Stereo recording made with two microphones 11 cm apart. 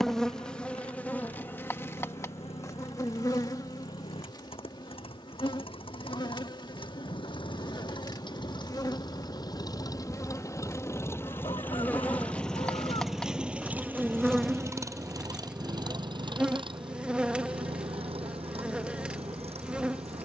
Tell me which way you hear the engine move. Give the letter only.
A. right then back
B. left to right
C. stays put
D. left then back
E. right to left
B.